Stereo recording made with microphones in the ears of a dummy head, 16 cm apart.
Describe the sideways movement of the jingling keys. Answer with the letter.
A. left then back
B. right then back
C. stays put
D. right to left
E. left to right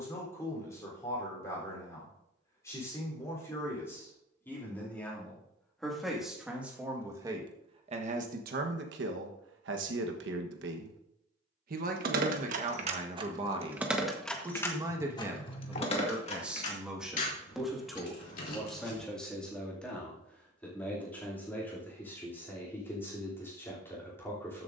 D.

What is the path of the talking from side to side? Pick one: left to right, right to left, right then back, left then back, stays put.
right then back.